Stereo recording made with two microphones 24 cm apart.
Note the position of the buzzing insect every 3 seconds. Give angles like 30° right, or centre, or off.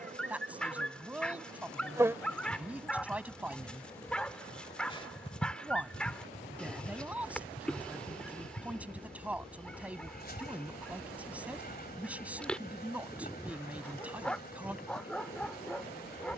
20° right, 20° left, 40° left, 40° left, 40° left, 40° left.